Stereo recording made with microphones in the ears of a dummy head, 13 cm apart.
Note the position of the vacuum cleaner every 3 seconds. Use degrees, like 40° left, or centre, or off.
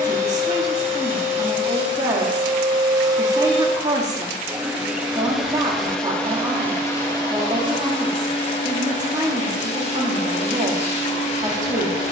40° right, 10° right, 30° left, 50° left.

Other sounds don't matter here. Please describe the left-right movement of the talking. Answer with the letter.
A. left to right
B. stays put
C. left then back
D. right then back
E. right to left
B.